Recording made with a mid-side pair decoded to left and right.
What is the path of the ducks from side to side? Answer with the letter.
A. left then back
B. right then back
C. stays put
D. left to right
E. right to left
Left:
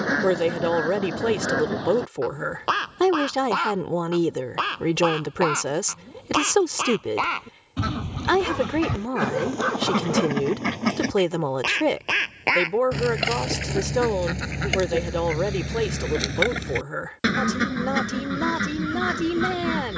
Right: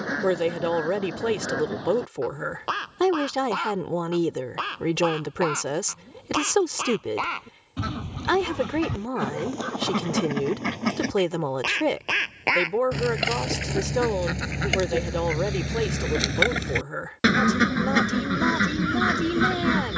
D.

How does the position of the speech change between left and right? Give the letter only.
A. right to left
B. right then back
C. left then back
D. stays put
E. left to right
D.